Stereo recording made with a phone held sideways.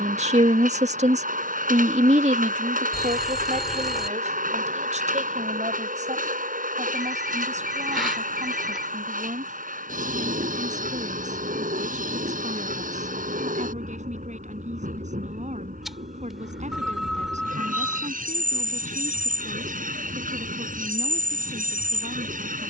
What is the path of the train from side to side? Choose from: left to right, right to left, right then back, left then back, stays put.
stays put.